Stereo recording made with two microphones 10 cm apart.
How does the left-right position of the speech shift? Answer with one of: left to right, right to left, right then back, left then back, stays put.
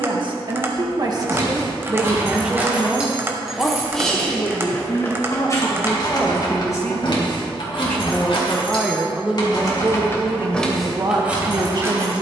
left then back.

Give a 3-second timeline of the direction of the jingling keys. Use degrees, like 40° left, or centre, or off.
30° right, 20° left, 60° left, 10° left.